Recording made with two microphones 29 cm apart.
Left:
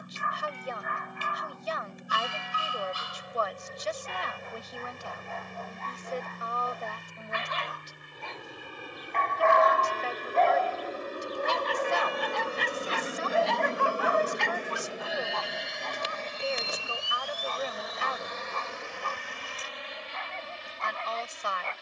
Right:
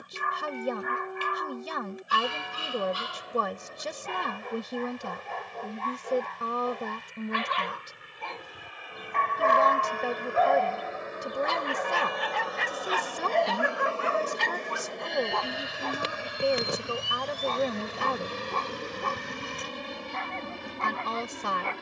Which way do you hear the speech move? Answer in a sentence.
In this clip you hear the speech stay in one place.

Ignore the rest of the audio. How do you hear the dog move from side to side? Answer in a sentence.
You can hear the dog go left and come back.